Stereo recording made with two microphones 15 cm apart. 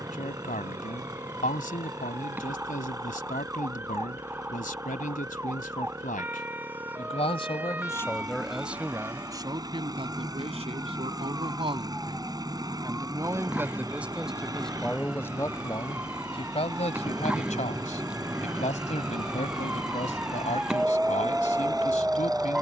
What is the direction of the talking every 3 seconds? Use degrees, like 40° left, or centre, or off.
60° left, 60° left, 30° left, 30° right, 10° right, 40° left, 50° left, 50° left.